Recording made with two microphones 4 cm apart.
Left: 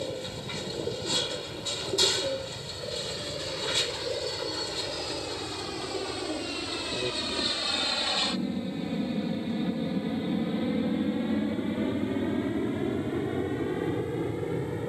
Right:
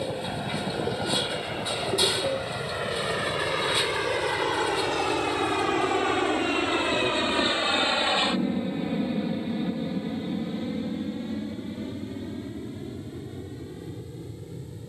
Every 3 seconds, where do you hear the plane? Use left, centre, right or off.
right, right, right, centre, left.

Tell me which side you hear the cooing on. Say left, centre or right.
centre.